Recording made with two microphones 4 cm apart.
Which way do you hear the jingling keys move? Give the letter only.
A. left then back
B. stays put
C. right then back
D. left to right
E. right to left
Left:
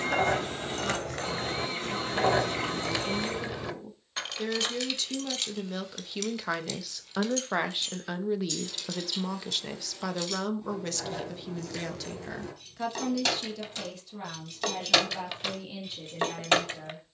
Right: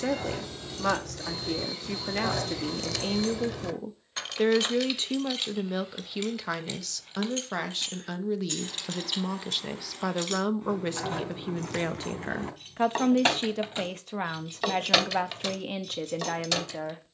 C.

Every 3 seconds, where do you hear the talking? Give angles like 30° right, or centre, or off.
70° right, 30° right, 10° left, 10° right, 40° right, 60° right.